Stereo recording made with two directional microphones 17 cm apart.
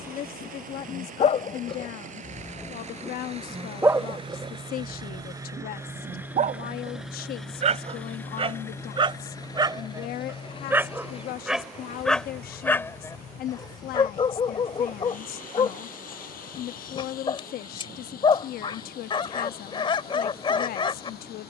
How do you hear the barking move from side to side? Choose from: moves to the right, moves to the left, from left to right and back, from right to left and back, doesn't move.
from left to right and back.